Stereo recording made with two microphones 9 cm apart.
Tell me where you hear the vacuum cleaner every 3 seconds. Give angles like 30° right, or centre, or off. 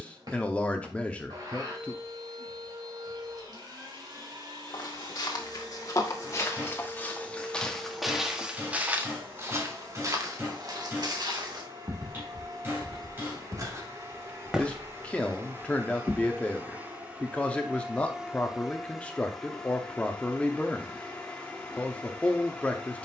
50° right, 50° right, 50° right, 50° right, 40° right, 20° right, centre, 10° left.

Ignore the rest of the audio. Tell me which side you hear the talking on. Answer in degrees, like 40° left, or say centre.
10° left.